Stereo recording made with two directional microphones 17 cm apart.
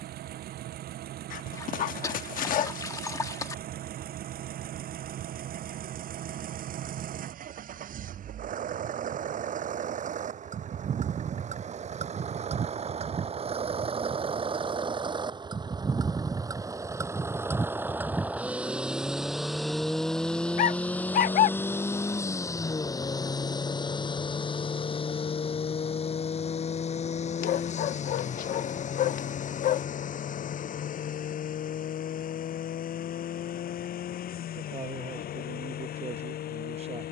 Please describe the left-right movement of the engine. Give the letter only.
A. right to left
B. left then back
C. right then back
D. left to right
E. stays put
A.